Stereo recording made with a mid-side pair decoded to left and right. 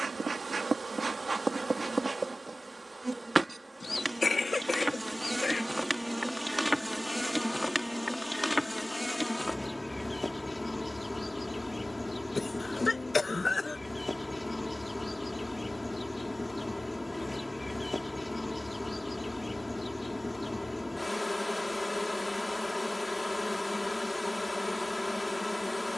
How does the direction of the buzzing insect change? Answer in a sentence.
You can hear the buzzing insect move from right to left.